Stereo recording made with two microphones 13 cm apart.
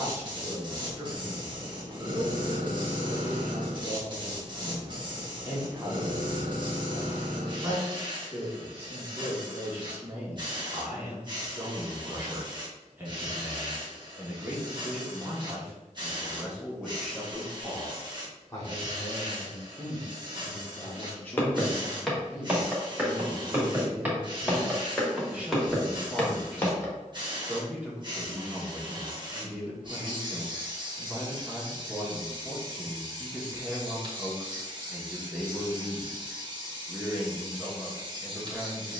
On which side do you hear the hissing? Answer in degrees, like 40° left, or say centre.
40° right.